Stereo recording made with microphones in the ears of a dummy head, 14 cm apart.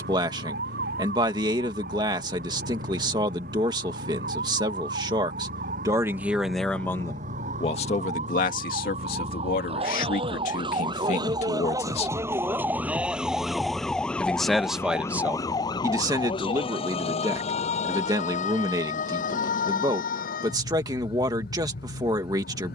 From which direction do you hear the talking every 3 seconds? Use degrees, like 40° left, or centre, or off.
20° right, 20° right, 30° left, 50° left, centre, 20° right, 20° right, 20° right.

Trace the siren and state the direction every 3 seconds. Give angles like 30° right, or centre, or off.
70° right, 60° right, 50° right, 30° right, centre, 30° left, 50° left, 60° left.